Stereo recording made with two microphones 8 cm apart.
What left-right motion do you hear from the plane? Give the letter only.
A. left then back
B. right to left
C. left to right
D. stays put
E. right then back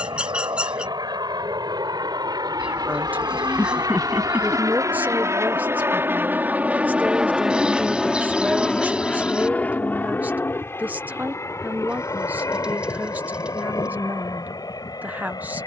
B.